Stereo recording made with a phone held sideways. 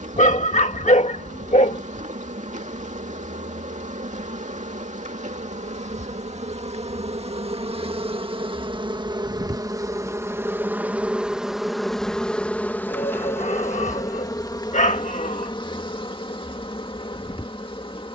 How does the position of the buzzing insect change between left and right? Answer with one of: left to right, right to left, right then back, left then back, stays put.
right to left.